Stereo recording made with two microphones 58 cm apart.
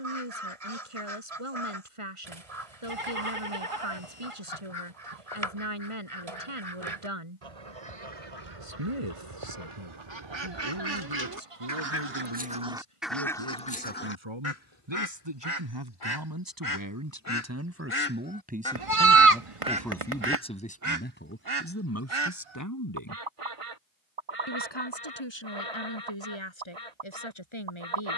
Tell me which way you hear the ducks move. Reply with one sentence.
In this clip you hear the ducks move from right to left and back again.